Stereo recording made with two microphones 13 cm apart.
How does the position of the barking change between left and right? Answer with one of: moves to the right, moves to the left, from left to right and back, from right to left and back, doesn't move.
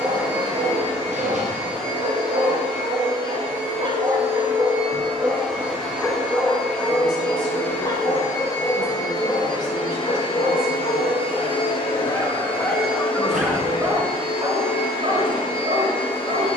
from right to left and back.